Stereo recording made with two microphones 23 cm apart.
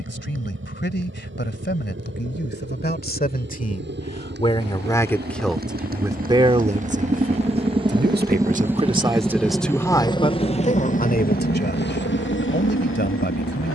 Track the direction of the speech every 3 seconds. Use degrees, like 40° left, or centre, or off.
50° left, 20° left, 30° right, 20° left, 50° left.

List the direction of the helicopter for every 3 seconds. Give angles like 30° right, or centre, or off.
60° right, 50° right, 30° right, 20° left, 60° left.